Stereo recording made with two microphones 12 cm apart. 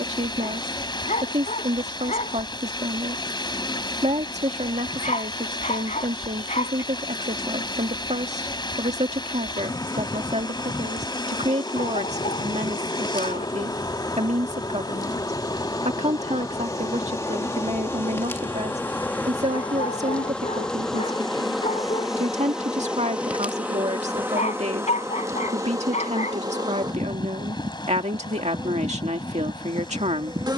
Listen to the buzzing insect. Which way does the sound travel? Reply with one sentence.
You can hear the buzzing insect travel towards the right.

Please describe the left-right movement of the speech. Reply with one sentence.
In this clip you hear the speech stay in one place.